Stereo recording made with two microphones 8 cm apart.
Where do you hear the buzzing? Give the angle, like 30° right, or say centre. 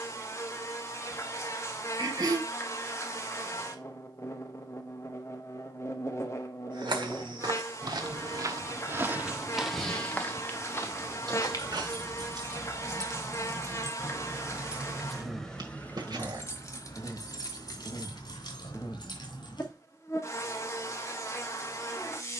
40° left.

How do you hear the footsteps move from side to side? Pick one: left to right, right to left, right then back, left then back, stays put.
right to left.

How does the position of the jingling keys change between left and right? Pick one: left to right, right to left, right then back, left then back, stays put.
right to left.